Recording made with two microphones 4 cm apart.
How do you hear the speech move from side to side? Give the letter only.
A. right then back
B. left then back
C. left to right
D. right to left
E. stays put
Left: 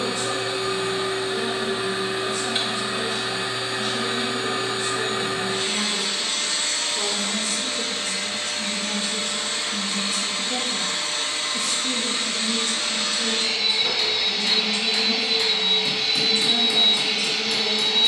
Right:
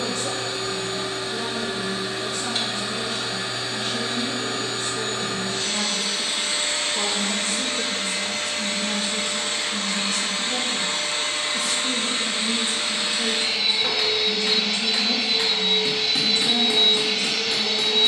B.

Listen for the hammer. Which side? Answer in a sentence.
You can hear the hammer on the right.